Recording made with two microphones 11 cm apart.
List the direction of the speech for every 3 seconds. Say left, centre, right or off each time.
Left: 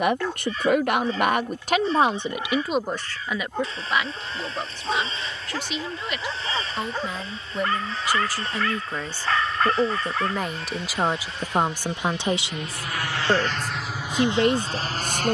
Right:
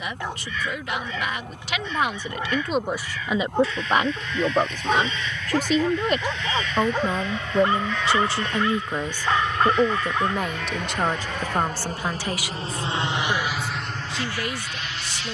left, right, right, centre, left.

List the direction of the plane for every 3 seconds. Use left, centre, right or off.
right, right, right, right, centre.